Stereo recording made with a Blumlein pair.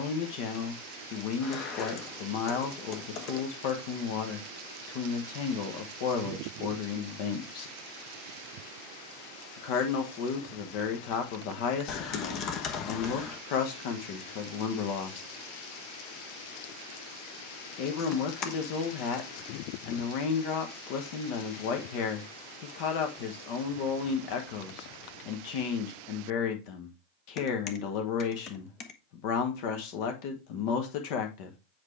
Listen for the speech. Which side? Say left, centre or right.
left.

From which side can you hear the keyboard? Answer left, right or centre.
left.